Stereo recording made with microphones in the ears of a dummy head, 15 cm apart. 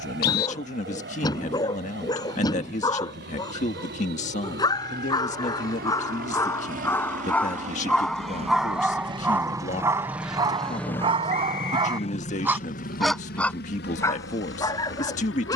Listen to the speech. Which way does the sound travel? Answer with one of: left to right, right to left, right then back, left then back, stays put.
stays put.